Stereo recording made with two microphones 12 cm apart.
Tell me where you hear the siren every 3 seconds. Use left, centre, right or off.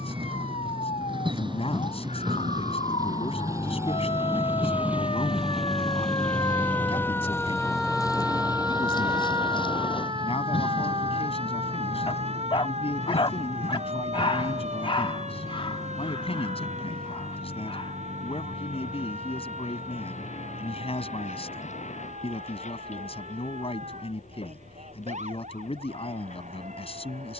left, left, centre, right, right, right, right, right, right.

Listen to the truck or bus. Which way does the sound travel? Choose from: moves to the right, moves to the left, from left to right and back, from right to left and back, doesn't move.
moves to the left.